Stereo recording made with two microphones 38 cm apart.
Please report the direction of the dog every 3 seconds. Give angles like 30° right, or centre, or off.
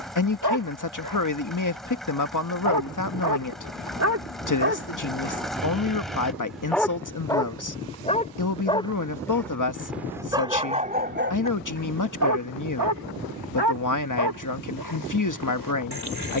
70° right, 40° right, 10° left, 20° right, 70° right, 80° right.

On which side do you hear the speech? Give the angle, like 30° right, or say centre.
50° left.